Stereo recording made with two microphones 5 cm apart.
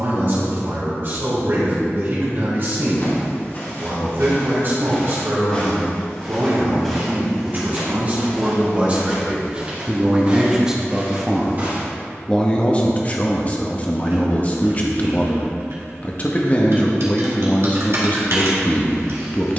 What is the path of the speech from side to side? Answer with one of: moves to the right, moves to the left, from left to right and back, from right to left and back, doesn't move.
moves to the left.